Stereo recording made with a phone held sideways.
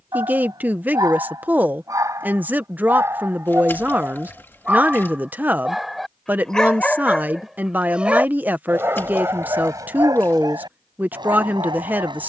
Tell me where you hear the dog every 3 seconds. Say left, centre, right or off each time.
right, centre, centre, right.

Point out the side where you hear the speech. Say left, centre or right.
centre.